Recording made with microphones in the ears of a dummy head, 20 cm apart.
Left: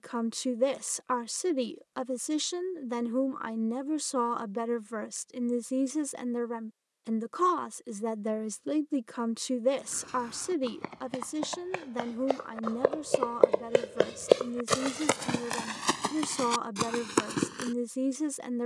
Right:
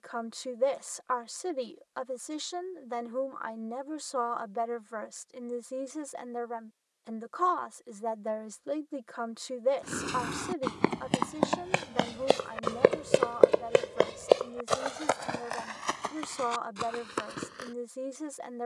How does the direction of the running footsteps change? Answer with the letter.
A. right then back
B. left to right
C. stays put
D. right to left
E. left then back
D.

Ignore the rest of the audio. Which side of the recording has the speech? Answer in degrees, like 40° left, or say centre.
40° left.